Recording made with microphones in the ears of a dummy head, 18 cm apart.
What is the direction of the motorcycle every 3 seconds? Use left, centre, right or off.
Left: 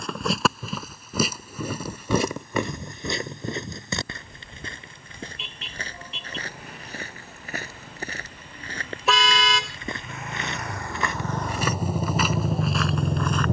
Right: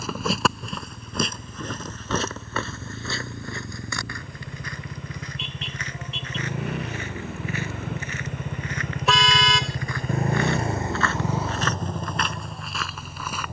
right, right, right, right, left.